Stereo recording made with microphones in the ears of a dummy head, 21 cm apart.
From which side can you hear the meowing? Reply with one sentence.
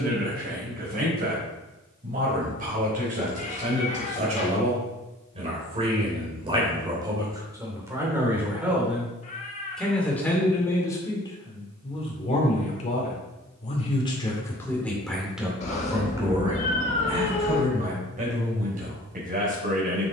You can hear the meowing on the left.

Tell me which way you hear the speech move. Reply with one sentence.
In this clip you hear the speech go left and come back.